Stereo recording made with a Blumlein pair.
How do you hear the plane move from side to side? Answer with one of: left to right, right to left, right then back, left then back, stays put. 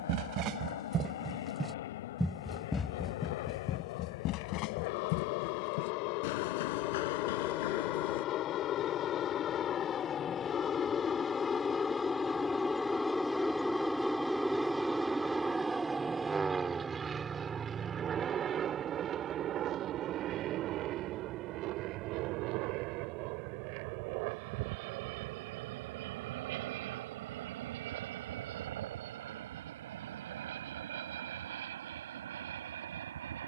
left to right.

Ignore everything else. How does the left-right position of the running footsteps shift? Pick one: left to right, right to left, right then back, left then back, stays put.
right to left.